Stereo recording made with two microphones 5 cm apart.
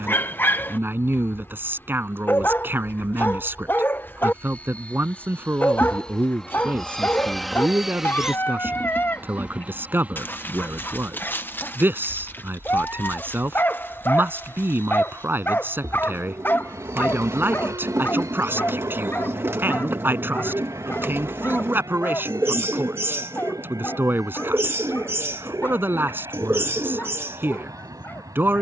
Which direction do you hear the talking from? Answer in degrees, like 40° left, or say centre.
40° right.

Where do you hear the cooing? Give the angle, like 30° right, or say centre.
50° right.